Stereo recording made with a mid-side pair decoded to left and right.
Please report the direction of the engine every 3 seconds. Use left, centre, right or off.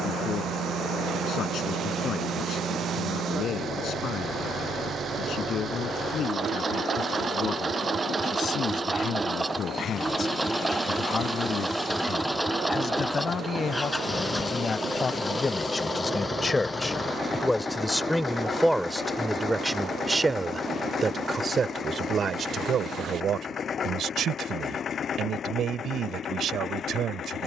right, right, right, centre, centre, left, left, left, left.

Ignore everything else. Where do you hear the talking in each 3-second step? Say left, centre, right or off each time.
left, left, left, left, left, left, centre, right, right.